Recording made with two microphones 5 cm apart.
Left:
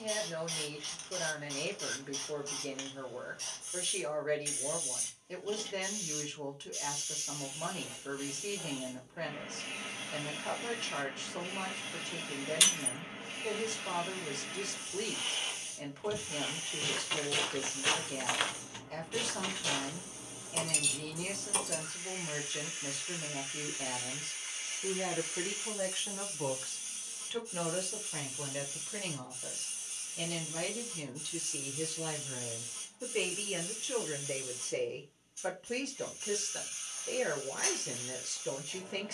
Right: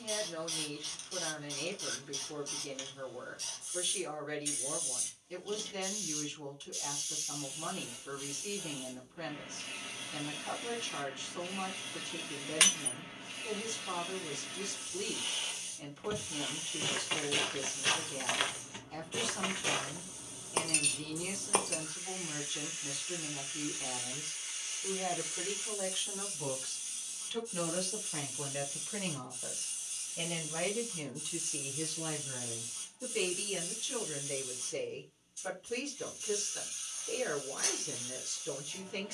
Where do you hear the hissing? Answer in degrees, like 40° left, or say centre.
40° left.